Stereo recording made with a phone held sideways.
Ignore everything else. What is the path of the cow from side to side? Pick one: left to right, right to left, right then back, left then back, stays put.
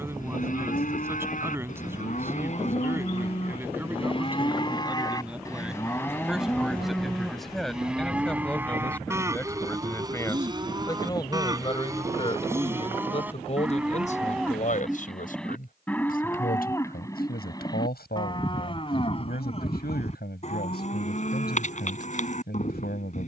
right then back.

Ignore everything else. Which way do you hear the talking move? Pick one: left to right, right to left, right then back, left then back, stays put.
right to left.